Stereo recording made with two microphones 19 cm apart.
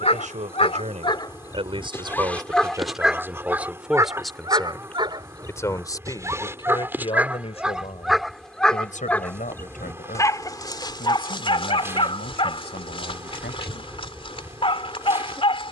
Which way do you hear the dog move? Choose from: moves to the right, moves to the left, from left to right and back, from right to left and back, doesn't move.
from left to right and back.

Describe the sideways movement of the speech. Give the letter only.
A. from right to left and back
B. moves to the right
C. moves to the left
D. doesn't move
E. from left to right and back
C.